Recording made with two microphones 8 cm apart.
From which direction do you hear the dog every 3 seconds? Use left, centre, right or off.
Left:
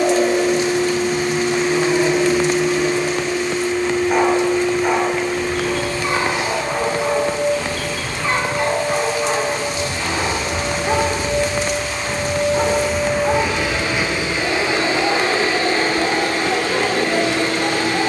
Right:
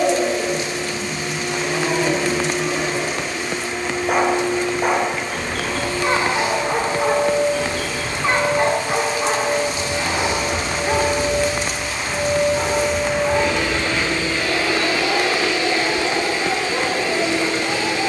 right, right, right, centre, left, left.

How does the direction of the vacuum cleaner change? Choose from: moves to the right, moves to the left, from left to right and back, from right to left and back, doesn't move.
from left to right and back.